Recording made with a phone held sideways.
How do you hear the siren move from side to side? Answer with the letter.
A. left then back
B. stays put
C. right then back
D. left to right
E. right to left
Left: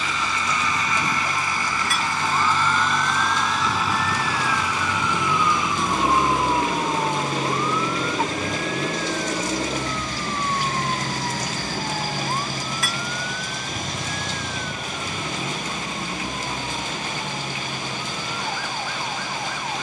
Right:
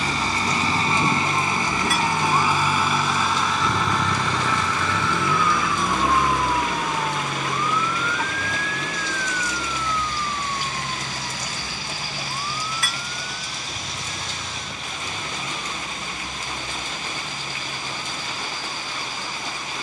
E.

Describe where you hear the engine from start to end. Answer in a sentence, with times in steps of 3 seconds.
In this clip you hear the engine on the right from 0 s, in the centre from 3 s and on the left from 6 s.